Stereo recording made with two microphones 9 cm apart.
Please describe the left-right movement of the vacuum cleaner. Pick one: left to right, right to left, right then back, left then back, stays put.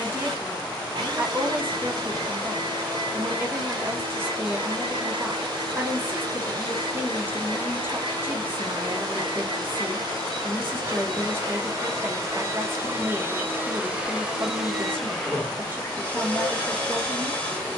right to left.